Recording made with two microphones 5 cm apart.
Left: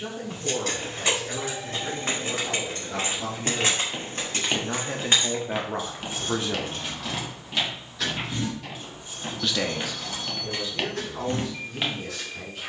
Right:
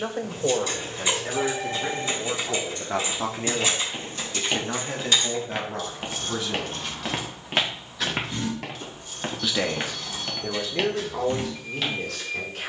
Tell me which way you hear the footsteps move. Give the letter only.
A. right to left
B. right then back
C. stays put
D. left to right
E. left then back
B.